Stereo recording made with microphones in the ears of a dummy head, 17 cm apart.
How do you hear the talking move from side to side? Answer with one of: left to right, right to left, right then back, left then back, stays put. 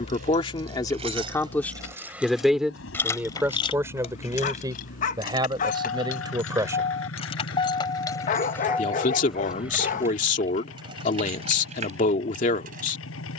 right then back.